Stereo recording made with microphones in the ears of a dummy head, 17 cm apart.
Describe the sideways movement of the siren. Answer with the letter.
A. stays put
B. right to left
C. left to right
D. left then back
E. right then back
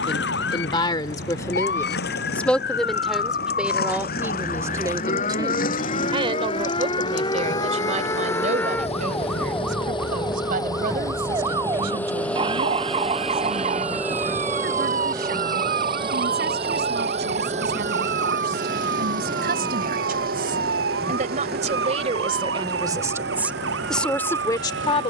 C.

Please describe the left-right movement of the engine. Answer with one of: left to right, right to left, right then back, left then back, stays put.
left to right.